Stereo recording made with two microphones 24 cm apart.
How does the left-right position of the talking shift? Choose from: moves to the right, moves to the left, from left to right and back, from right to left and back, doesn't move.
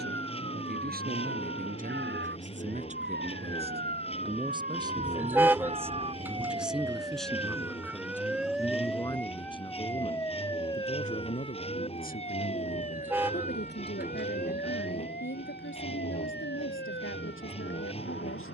moves to the left.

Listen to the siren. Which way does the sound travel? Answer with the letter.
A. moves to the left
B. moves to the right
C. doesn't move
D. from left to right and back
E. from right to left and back
A.